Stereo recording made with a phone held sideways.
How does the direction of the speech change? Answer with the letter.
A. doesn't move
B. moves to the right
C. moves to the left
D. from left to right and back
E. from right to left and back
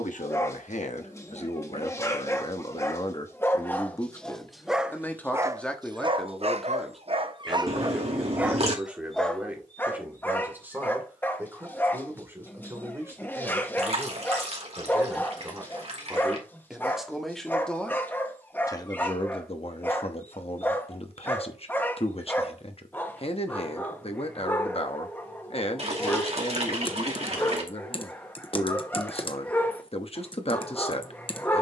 D.